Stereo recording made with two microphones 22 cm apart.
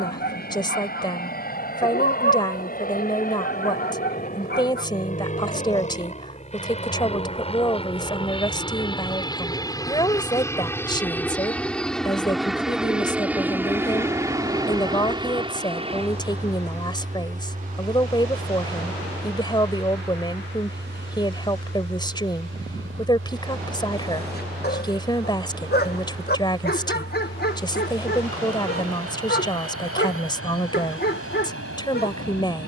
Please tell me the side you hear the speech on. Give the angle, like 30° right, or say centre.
20° left.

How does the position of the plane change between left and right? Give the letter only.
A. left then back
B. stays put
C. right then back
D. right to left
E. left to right
E.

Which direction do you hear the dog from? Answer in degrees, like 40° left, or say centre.
50° left.